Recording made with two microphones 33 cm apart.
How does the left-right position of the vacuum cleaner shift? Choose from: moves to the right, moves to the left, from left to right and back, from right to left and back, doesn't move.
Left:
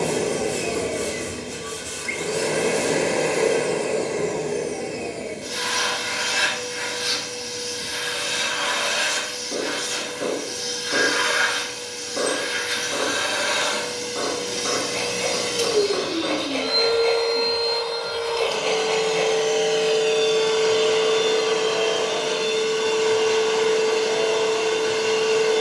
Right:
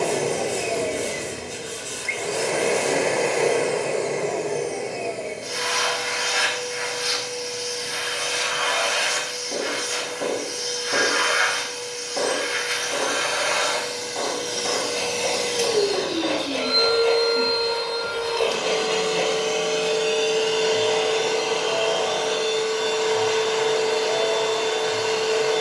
from left to right and back.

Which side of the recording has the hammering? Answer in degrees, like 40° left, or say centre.
10° left.